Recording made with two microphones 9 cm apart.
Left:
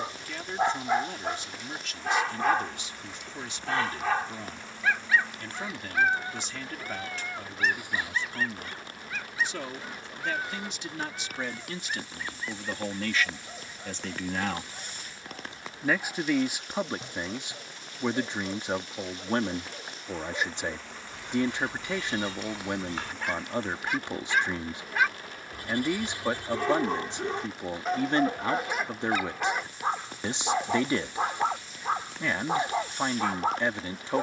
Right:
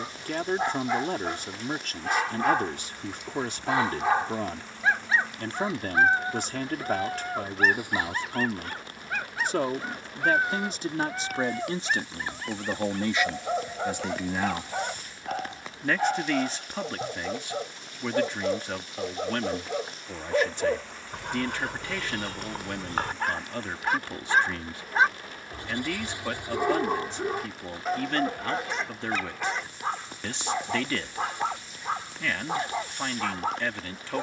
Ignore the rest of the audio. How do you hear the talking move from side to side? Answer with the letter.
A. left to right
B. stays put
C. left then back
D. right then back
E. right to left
E.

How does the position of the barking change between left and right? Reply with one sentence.
In this clip you hear the barking move from left to right and back again.